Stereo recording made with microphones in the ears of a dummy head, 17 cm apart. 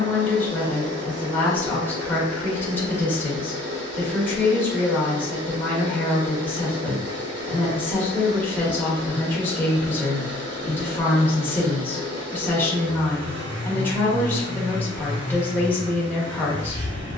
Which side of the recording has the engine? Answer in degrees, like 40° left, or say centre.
60° right.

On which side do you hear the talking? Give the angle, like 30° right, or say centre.
10° left.